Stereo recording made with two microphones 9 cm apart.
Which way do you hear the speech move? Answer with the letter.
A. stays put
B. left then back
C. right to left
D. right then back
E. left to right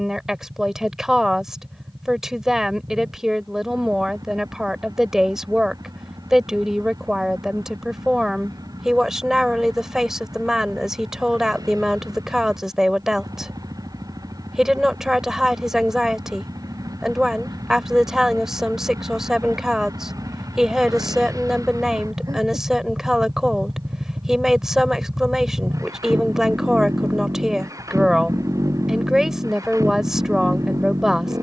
A.